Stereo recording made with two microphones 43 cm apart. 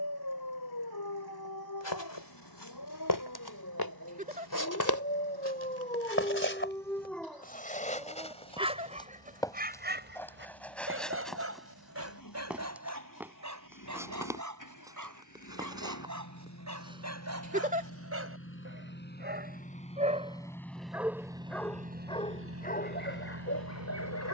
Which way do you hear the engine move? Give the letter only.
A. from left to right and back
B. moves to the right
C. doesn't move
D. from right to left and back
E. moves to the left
B.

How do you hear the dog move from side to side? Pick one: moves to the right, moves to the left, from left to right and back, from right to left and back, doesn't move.
from left to right and back.